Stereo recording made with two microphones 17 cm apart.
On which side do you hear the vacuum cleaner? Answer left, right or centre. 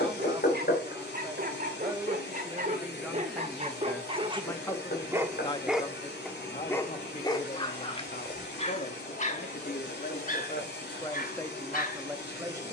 left.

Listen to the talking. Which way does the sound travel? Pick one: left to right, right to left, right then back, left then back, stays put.
left then back.